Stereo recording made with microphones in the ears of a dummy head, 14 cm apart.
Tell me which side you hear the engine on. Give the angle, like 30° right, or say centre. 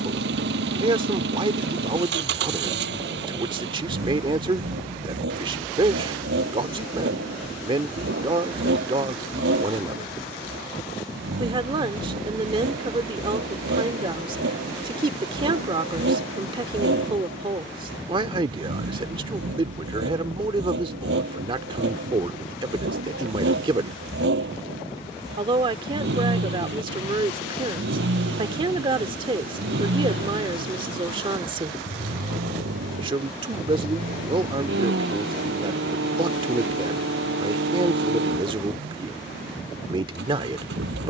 80° right.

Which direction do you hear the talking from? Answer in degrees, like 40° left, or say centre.
30° right.